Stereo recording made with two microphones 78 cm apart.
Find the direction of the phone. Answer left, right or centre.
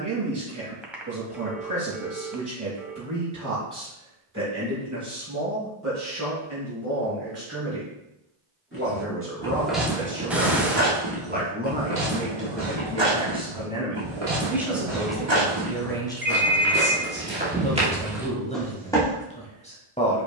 centre.